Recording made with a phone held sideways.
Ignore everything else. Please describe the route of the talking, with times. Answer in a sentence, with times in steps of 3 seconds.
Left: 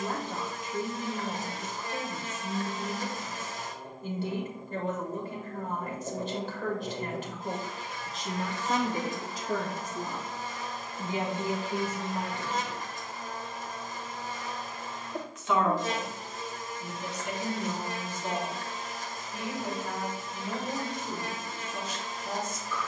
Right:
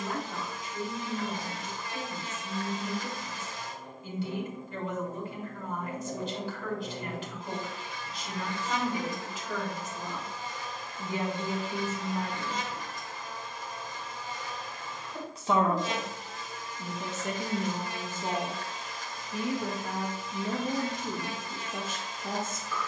In this clip you hear the talking on the left from 0 s, in the centre from 12 s and on the right from 15 s.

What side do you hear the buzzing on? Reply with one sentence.
You can hear the buzzing on the left.